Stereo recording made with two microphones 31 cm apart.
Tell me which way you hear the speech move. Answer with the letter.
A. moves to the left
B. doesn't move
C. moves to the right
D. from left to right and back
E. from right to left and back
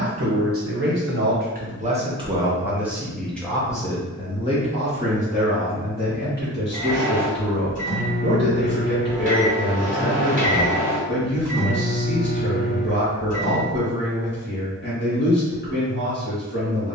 A.